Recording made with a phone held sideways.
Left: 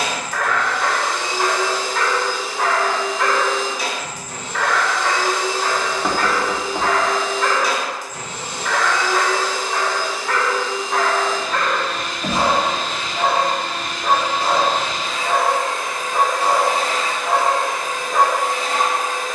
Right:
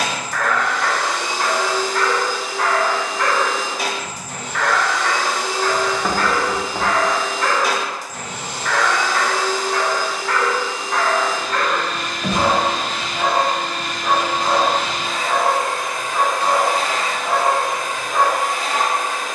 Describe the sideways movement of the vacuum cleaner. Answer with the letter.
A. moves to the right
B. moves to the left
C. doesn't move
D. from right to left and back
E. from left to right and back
C.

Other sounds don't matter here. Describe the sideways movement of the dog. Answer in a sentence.
In this clip you hear the dog stay in one place.